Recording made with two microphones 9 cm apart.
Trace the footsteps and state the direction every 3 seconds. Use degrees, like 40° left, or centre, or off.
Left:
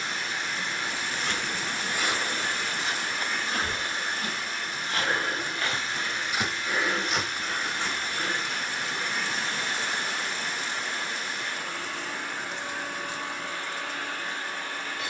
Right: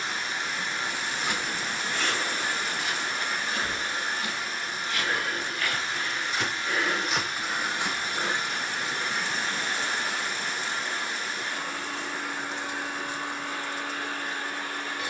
10° left, 40° left, centre, off, off.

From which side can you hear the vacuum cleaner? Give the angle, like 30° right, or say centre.
10° right.